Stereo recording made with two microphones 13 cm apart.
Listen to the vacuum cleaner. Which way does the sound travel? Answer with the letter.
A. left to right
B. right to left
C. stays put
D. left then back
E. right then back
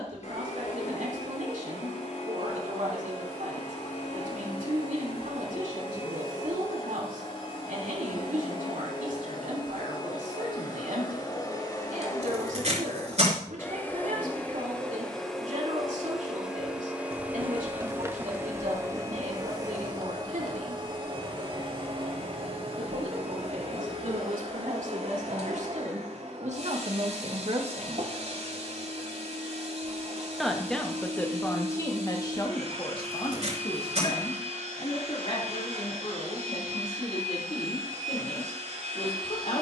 A.